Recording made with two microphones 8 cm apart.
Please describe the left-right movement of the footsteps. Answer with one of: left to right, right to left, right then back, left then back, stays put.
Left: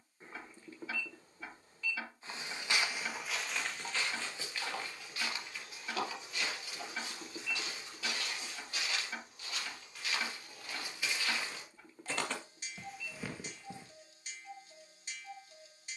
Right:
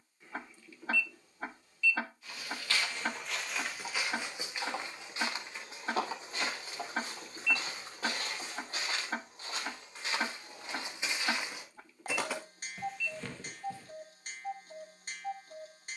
right then back.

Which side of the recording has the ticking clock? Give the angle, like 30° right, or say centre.
50° right.